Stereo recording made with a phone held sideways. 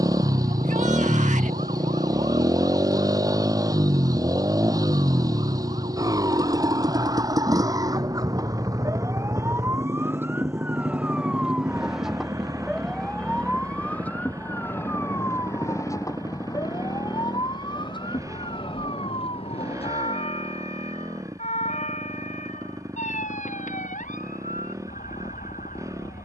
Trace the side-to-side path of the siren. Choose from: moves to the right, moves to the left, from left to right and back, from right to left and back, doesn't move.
moves to the left.